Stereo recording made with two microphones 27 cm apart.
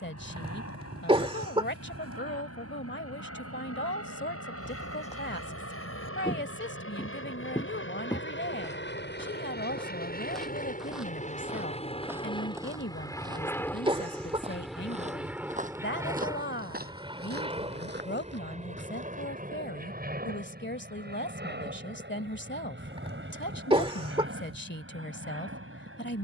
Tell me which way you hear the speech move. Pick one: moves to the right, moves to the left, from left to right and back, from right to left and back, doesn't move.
doesn't move.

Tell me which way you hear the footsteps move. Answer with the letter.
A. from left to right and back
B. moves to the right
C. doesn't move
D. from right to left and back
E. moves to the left
B.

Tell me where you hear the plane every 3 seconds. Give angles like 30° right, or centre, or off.
70° left, 60° left, 50° left, 30° left, 10° left, 10° right, 30° right, 40° right, 50° right.